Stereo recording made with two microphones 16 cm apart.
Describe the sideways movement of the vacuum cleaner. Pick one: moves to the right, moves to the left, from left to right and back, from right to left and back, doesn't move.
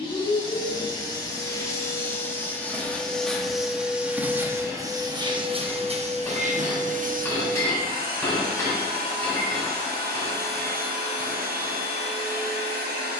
moves to the right.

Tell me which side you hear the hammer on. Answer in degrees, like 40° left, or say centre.
20° left.